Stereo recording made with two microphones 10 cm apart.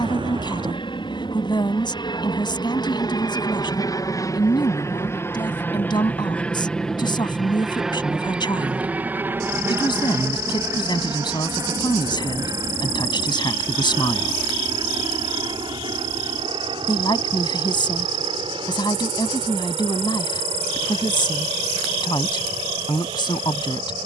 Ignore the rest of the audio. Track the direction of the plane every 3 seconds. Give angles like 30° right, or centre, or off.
60° left, 30° left, centre, 30° right, 40° right, 50° right, 60° right, 60° right.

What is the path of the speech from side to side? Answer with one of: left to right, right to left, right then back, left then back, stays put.
stays put.